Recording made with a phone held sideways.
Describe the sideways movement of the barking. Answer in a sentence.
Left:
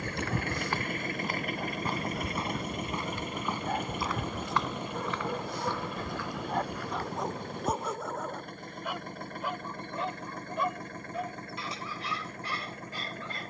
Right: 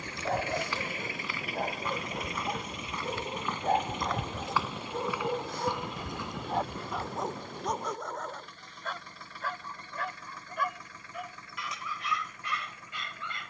You can hear the barking go from the right side to the left.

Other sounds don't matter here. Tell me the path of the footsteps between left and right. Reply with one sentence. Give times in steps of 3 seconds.
In this clip you hear the footsteps on the left from 0 s, in the centre from 3 s, on the right from 6 s and not at all from 9 s.